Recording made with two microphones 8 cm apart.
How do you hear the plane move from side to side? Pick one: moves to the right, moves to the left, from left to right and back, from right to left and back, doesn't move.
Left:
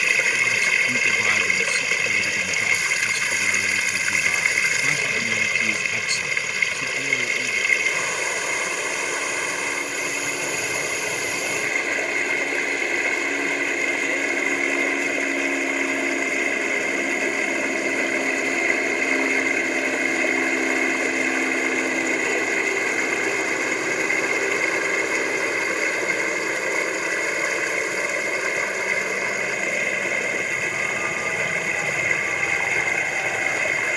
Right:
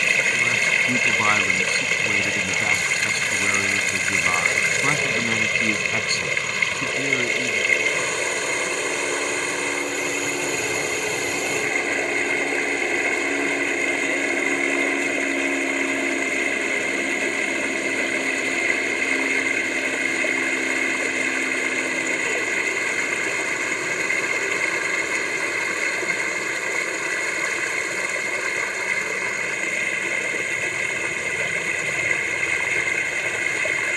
moves to the left.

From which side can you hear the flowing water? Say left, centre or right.
centre.